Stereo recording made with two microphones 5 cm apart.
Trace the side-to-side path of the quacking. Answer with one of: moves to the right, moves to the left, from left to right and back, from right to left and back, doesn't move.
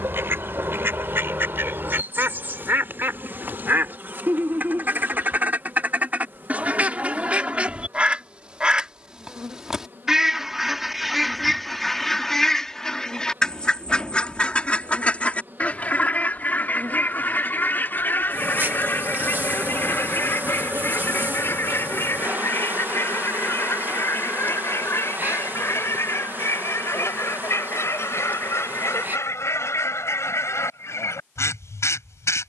moves to the left.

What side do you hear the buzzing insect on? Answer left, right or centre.
right.